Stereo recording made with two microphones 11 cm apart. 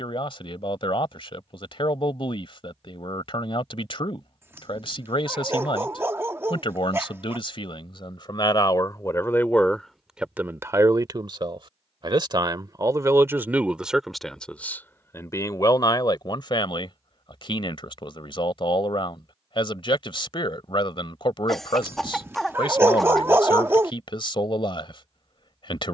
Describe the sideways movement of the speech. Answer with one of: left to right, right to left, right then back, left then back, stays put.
right then back.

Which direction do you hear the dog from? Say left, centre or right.
right.